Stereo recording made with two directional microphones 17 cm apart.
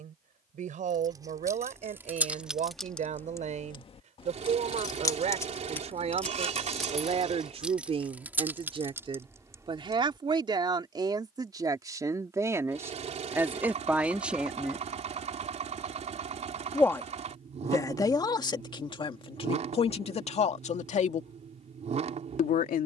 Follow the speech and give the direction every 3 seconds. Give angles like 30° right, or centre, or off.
50° right, 40° right, 40° right, 30° right, 10° right, 20° left, 30° left, 50° left.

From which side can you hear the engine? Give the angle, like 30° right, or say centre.
40° right.